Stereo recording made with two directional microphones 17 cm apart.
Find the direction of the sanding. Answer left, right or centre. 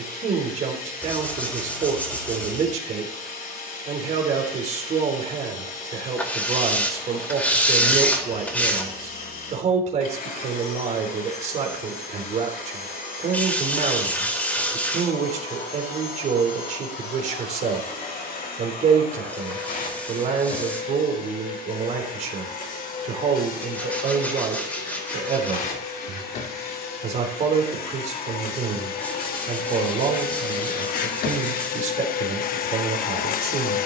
centre.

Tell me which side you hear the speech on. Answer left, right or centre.
right.